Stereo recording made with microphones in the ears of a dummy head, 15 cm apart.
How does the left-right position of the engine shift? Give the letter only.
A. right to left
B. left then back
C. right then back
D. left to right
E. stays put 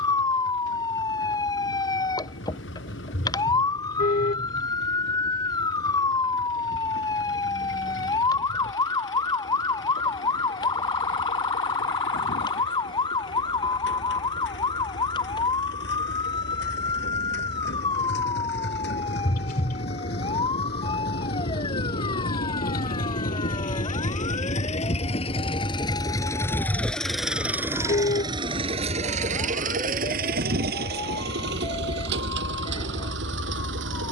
D.